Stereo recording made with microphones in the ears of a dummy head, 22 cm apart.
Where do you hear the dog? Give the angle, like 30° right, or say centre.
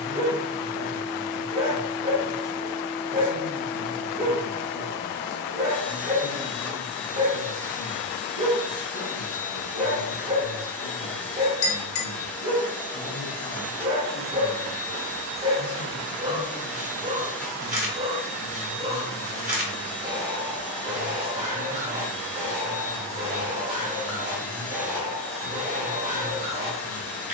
30° right.